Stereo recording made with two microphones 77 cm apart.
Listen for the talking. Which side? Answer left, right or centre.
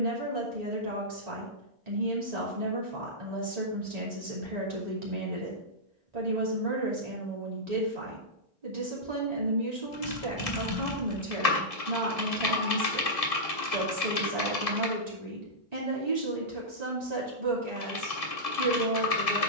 right.